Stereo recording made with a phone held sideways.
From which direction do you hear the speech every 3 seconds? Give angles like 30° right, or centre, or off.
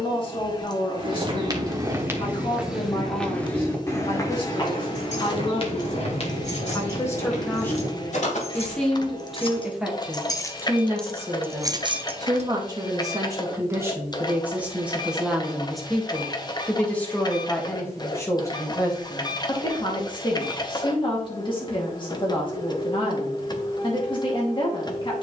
40° left, 40° left, 10° left, 10° right, 20° right, 10° left, 30° left, 40° left, 40° left.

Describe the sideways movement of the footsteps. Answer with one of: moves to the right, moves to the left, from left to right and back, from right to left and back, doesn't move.
moves to the left.